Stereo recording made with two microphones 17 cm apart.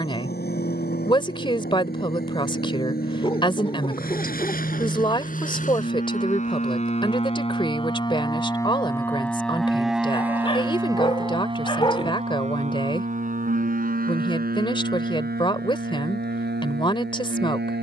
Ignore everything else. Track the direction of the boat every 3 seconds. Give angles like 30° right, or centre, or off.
60° left, 50° left, 30° left, 10° right, 50° right, 70° right.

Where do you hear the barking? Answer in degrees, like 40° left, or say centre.
30° left.